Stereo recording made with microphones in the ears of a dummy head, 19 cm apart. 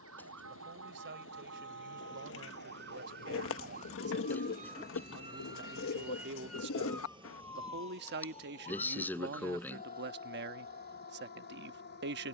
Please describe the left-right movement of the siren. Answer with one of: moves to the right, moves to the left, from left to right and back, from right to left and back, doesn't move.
moves to the left.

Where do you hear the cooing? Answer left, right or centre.
left.